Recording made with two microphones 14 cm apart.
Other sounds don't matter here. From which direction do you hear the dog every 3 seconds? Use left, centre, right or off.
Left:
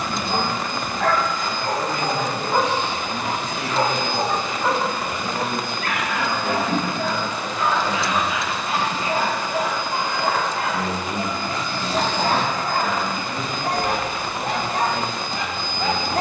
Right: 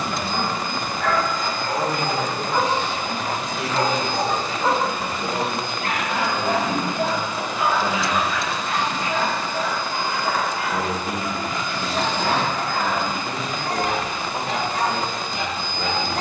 left, centre, centre, left, left, left.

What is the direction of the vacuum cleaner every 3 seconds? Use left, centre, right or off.
right, right, centre, left, left, left.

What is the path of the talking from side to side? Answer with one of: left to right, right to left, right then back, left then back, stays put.
stays put.